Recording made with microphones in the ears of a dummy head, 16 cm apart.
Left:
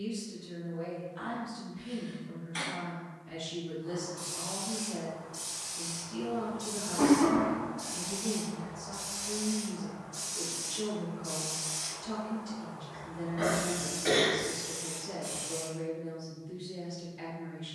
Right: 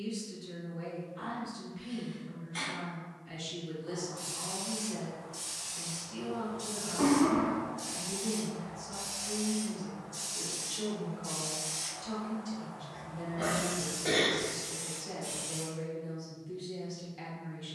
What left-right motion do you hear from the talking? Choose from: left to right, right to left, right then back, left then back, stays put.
left then back.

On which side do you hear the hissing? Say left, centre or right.
right.